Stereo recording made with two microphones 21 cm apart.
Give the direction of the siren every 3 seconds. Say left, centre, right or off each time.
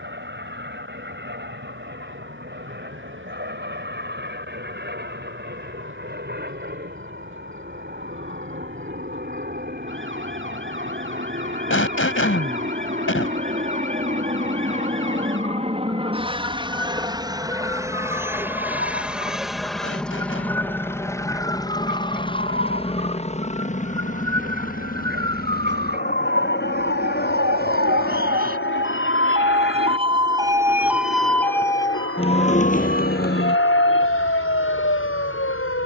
right, right, right, right, right, right, right, right, right, right, centre, left.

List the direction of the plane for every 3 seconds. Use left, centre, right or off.
right, right, right, right, right, right, centre, left, left, left, left, left.